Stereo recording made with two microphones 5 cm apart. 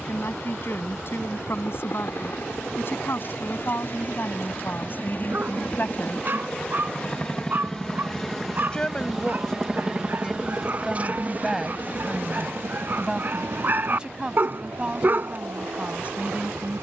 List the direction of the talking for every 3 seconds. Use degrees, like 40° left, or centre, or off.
60° left, 50° left, 30° left, 10° left, 10° right, 30° right.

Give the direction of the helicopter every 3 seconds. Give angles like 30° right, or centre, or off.
50° left, 40° left, 10° left, 20° right, 50° right, 70° right.